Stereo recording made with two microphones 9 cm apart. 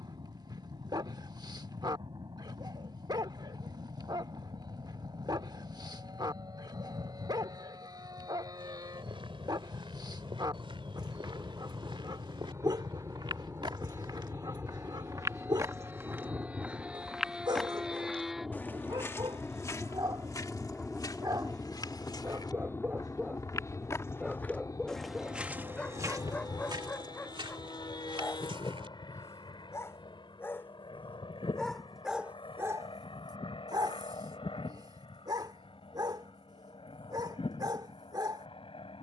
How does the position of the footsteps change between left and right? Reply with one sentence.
In this clip you hear the footsteps go left and come back.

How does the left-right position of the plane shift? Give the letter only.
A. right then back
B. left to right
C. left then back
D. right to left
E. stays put
D.